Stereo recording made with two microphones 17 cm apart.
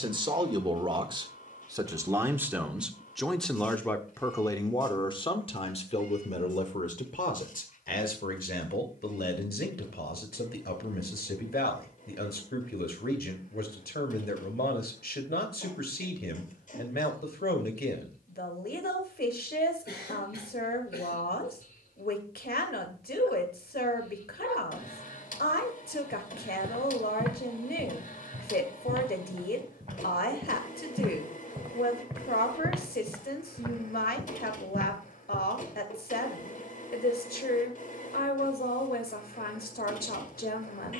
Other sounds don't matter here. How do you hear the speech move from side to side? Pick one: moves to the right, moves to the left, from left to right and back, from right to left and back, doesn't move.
moves to the left.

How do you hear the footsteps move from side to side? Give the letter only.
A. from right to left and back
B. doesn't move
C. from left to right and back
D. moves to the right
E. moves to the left
C.